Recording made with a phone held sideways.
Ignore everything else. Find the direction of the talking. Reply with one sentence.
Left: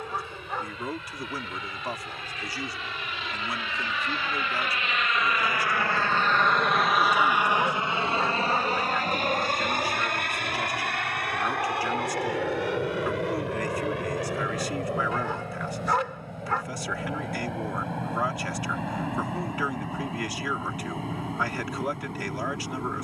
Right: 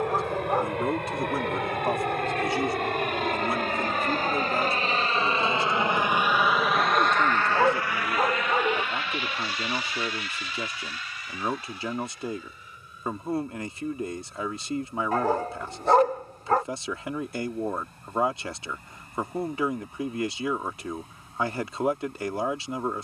In this clip you hear the talking on the right.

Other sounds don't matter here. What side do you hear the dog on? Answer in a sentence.
You can hear the dog on the right.